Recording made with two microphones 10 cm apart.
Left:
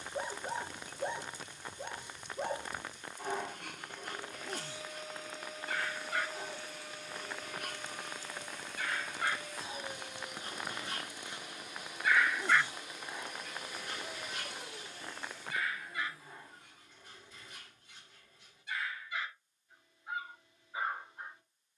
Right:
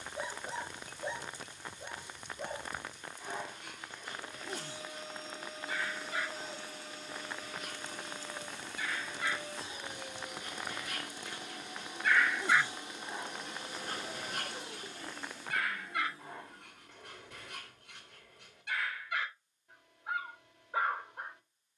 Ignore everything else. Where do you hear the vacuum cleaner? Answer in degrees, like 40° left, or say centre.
30° right.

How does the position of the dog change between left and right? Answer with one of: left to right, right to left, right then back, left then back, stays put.
left to right.